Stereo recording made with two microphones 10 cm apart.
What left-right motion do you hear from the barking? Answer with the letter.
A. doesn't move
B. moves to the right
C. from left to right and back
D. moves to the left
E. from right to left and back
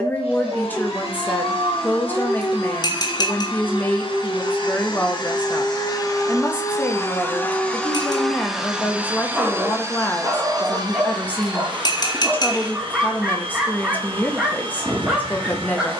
A.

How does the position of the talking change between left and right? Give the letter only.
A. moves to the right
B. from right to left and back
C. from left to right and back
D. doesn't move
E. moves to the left
D.